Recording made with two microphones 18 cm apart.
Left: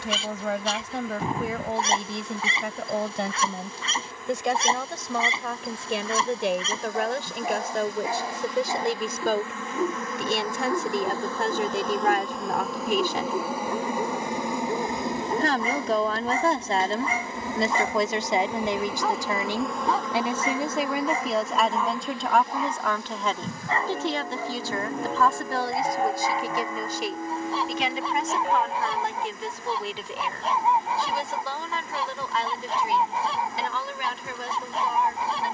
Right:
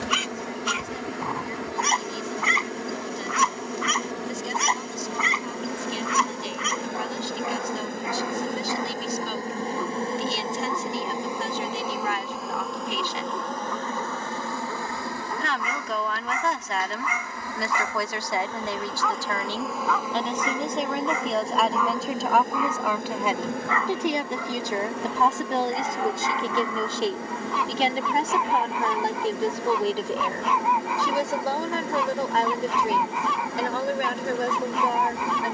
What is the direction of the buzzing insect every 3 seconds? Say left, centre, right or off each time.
right, right, right, right, centre, left, centre, right, right, right, right, right.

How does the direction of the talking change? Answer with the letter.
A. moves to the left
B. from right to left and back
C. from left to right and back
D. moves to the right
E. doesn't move
D.